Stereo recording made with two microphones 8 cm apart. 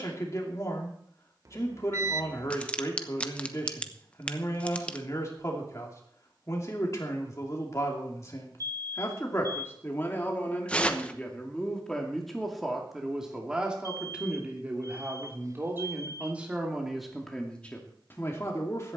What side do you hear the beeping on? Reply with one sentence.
You can hear the beeping on the right.